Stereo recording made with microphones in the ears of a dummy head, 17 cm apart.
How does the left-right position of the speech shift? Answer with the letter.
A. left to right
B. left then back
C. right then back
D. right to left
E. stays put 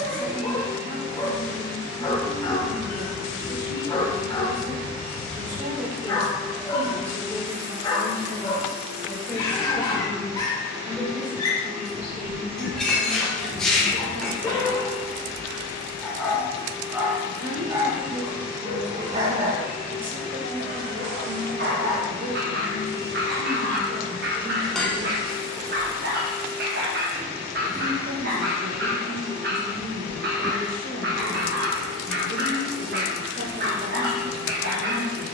B.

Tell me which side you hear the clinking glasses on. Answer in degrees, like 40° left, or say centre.
centre.